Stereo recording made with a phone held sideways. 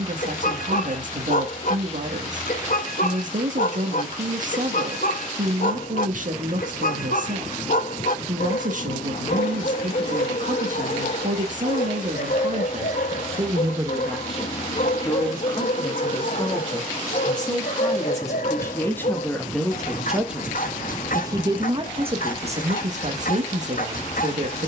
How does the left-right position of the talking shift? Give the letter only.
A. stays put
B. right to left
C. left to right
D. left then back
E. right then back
D.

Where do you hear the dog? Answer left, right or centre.
left.